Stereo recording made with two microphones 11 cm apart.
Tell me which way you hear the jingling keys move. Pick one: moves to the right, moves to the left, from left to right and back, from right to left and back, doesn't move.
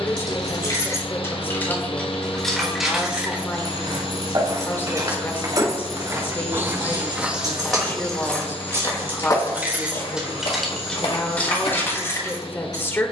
from left to right and back.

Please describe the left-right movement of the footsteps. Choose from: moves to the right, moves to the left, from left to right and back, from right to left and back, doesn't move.
moves to the left.